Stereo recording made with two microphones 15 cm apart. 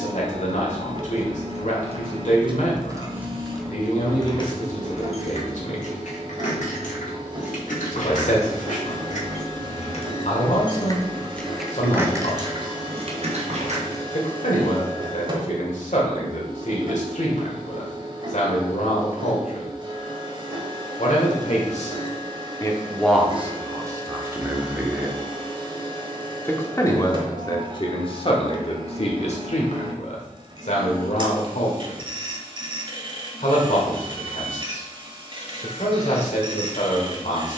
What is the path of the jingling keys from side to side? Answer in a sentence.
In this clip you hear the jingling keys move from right to left and back again.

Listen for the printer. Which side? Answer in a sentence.
In this clip you hear the printer on the right.